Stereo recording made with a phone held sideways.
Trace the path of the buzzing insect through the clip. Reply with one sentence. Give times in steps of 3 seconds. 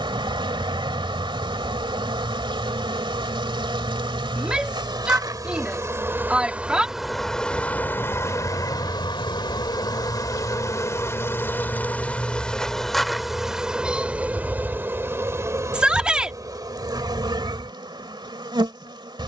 In this clip you hear the buzzing insect on the right from 0 s, in the centre from 6 s, on the left from 9 s, in the centre from 12 s and on the right from 15 s.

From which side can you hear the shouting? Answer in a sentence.
In this clip you hear the shouting in the centre.